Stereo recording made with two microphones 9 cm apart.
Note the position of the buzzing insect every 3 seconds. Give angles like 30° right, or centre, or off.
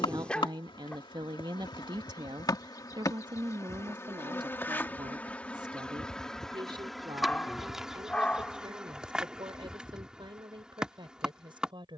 50° left, 20° left, centre, 10° right.